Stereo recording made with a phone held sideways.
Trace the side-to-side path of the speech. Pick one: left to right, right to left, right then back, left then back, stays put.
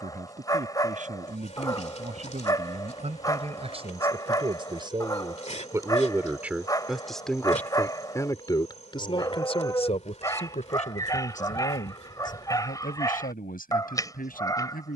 right to left.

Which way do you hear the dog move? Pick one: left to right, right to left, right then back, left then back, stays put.
stays put.